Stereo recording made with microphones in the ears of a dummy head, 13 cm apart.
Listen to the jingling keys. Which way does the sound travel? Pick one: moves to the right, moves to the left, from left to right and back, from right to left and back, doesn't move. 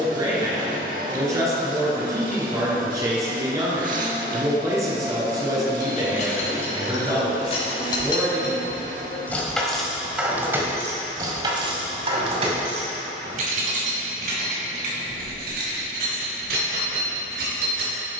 moves to the right.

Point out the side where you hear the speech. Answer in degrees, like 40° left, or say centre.
20° right.